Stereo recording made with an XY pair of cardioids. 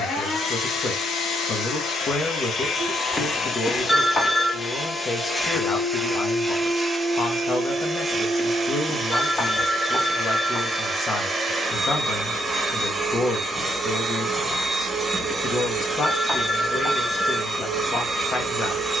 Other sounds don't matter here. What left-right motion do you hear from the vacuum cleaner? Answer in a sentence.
You can hear the vacuum cleaner move from left to right.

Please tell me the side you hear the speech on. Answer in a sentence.
In this clip you hear the speech on the left.